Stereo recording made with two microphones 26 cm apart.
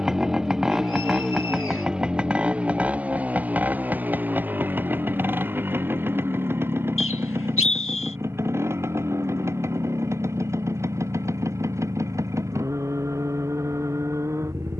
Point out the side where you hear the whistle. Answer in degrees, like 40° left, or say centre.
50° left.